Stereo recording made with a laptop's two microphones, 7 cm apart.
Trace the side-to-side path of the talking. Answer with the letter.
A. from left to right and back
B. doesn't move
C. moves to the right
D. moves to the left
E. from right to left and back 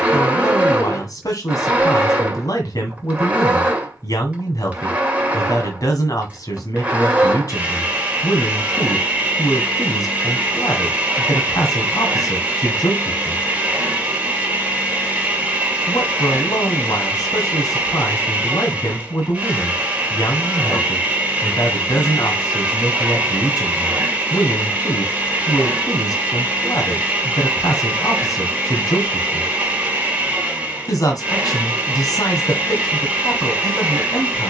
B.